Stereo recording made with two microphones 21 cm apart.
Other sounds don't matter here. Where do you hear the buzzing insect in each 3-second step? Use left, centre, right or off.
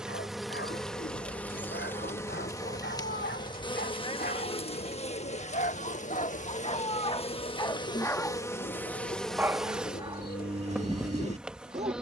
centre, left, left, centre.